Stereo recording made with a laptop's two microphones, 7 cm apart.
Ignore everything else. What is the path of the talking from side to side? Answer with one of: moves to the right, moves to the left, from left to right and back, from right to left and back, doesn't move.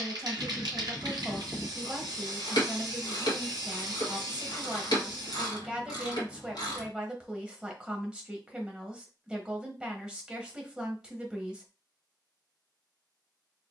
doesn't move.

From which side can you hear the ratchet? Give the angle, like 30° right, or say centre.
70° left.